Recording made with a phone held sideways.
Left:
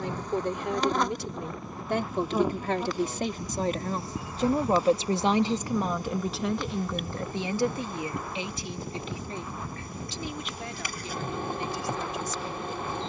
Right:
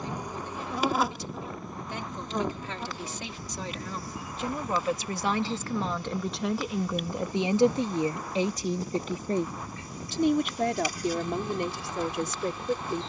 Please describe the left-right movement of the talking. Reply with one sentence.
You can hear the talking travel towards the right.